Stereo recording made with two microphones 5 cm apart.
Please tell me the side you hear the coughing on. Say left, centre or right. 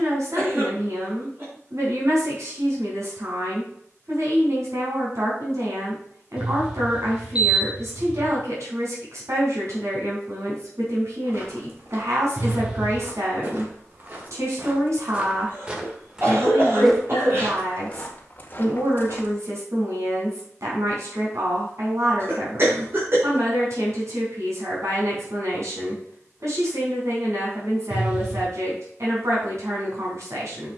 right.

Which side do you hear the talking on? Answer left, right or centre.
right.